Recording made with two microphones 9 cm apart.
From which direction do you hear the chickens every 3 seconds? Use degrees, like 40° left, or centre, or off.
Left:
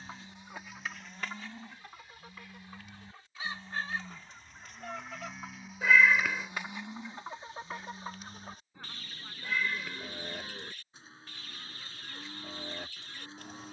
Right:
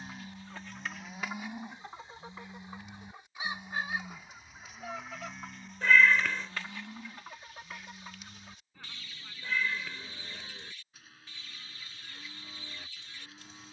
10° right, 10° right, 30° left, 60° left, 60° left.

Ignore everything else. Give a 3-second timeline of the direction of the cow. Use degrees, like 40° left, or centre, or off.
20° right, centre, 10° left, 30° left, 30° left.